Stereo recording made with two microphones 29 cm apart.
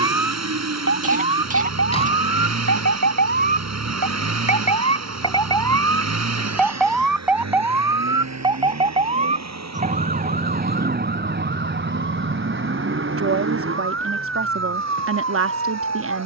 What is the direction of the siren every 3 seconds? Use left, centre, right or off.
left, left, centre, right, right, right.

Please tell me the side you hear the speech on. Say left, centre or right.
right.